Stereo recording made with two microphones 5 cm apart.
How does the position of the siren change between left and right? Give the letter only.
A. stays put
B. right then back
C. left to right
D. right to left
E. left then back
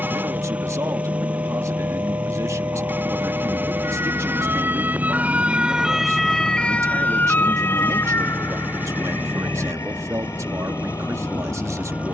D.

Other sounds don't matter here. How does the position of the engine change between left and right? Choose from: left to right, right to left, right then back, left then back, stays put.
stays put.